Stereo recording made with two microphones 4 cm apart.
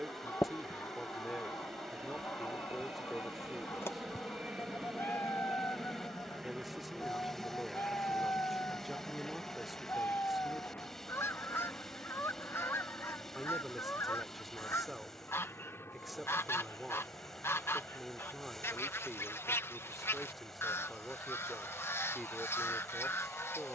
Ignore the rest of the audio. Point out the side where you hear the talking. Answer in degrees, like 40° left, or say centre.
centre.